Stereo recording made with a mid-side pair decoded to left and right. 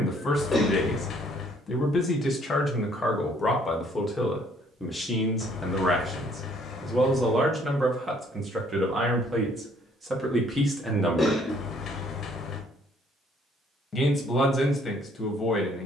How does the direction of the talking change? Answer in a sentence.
You can hear the talking move from left to right and back again.